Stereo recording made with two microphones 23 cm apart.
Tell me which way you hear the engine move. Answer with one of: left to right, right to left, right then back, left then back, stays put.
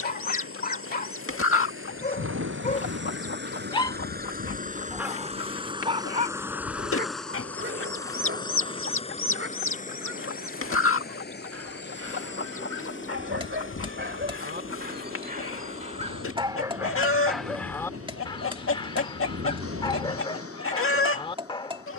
right to left.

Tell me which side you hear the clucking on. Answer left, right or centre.
left.